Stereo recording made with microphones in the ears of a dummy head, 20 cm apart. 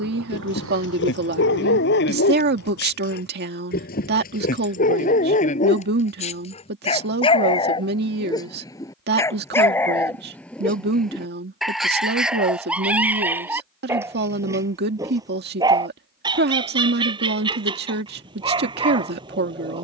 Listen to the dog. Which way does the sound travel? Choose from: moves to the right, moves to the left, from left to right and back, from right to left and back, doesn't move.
moves to the right.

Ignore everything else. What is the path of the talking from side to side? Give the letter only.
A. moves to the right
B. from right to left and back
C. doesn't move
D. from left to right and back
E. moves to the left
C.